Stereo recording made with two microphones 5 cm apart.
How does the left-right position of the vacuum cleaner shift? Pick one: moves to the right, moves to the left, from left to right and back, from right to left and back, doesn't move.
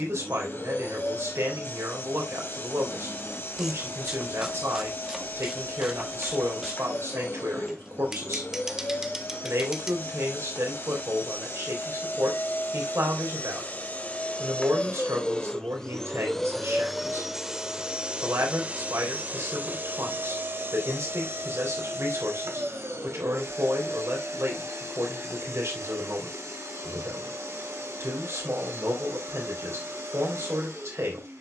moves to the right.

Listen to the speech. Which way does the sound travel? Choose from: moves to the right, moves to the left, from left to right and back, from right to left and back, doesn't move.
doesn't move.